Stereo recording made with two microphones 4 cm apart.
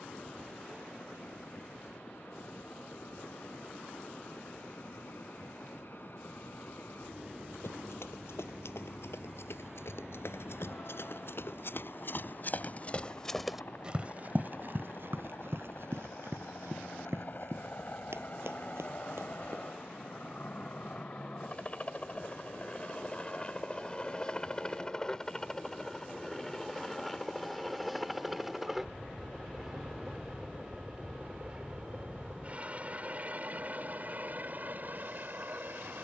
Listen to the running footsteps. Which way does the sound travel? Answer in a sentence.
In this clip you hear the running footsteps go from the left side to the right.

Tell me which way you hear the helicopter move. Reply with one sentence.
You can hear the helicopter move from left to right.